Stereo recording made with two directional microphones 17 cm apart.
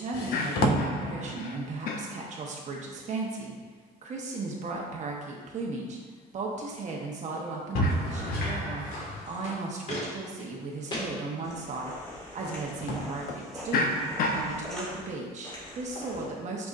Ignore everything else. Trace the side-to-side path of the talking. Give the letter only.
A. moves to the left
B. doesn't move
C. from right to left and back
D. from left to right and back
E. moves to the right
B.